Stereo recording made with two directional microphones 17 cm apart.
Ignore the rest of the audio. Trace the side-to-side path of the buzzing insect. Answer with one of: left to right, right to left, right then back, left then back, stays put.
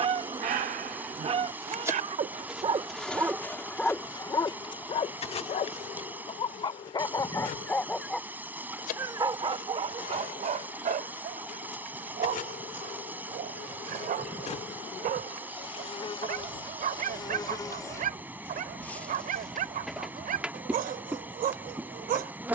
left then back.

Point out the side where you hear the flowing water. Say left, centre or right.
centre.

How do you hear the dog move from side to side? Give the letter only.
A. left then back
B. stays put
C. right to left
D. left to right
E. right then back
A.